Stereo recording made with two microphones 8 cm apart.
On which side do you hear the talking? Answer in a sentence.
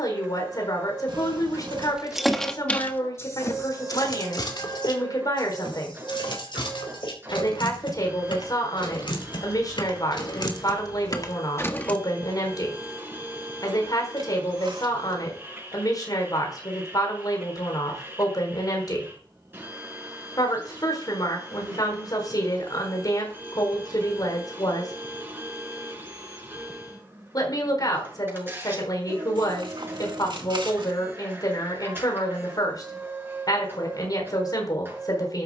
You can hear the talking on the left.